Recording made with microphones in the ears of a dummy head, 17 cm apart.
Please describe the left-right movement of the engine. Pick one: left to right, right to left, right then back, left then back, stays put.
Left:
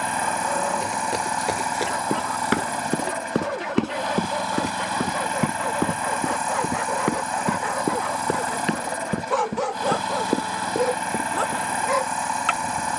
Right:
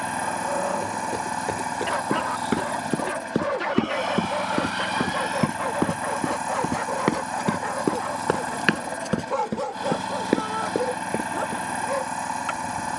stays put.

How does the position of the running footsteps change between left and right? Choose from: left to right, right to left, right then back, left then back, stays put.
left to right.